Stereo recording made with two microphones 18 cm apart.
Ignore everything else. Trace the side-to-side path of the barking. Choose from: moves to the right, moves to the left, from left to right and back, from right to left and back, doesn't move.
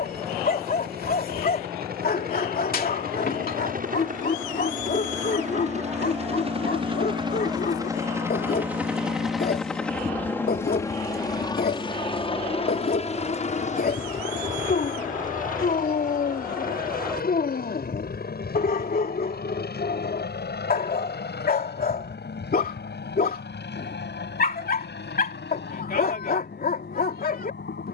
doesn't move.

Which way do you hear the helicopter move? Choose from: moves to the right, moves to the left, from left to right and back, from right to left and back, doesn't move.
moves to the left.